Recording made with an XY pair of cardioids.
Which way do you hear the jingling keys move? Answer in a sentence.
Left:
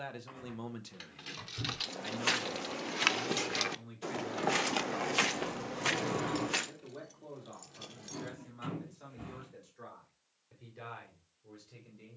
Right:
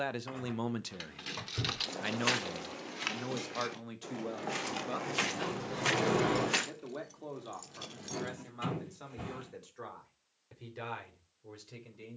In this clip you hear the jingling keys move from right to left and back again.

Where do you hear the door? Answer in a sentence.
In this clip you hear the door on the right.